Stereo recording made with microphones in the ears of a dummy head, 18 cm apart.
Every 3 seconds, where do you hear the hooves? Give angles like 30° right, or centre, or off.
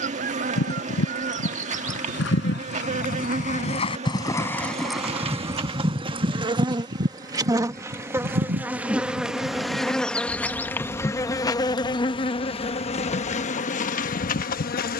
60° left, 10° left, 40° right, 60° right, 60° right.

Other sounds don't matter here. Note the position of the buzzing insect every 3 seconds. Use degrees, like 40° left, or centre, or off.
40° right, 30° right, 20° right, 10° left, 40° left.